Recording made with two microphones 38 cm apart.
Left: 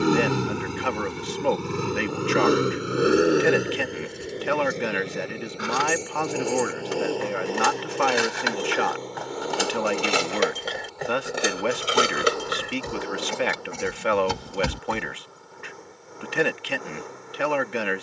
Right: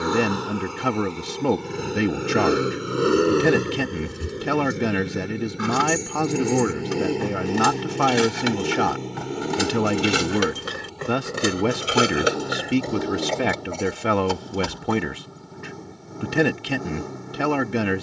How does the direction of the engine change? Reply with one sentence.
You can hear the engine move to the right.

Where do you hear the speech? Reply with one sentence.
In this clip you hear the speech on the right.